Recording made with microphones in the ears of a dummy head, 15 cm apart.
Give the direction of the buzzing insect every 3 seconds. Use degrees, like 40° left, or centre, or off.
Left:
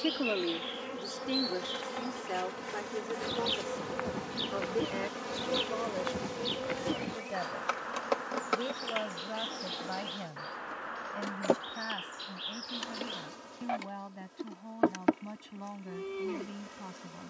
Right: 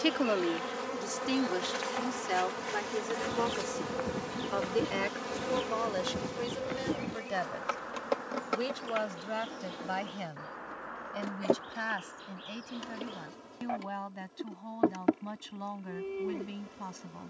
30° right, centre, 20° left, 30° left, 50° left, 50° left.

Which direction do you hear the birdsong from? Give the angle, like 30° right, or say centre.
80° left.